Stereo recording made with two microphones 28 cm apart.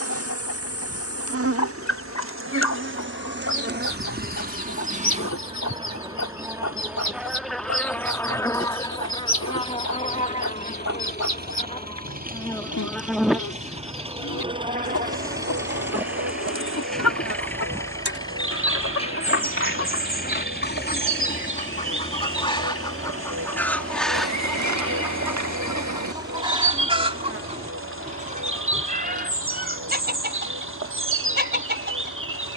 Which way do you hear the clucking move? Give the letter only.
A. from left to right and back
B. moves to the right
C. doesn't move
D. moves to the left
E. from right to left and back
B.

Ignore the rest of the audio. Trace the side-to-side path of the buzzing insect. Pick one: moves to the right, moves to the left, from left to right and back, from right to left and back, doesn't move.
from right to left and back.